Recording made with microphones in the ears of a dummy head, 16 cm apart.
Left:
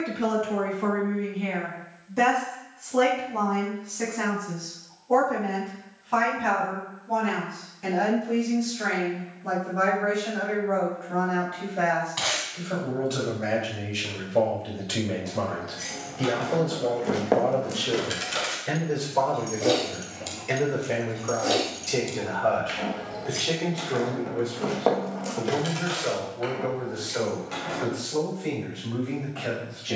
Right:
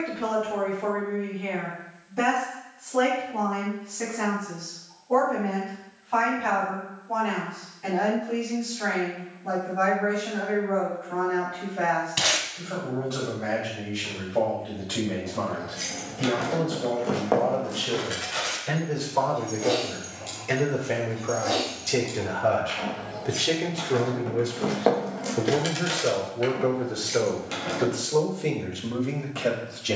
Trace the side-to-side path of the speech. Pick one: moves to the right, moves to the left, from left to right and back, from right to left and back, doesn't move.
moves to the right.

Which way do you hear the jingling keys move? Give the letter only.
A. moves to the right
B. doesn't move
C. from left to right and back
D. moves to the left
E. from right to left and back
E.